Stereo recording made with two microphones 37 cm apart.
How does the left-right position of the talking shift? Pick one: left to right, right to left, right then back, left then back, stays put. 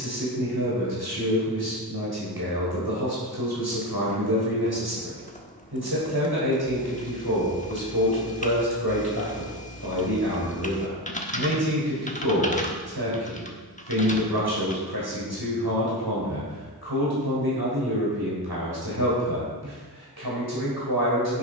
stays put.